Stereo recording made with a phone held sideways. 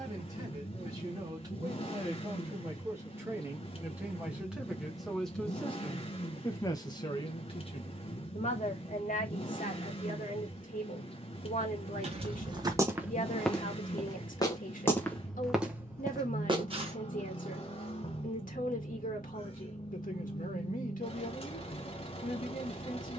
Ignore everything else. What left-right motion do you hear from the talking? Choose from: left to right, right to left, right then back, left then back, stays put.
right to left.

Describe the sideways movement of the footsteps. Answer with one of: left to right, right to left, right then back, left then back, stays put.
left then back.